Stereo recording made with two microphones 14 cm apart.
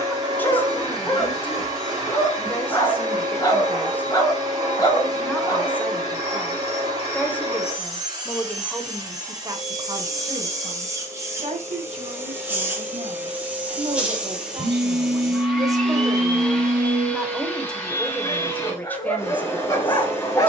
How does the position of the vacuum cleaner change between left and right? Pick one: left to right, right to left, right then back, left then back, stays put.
right to left.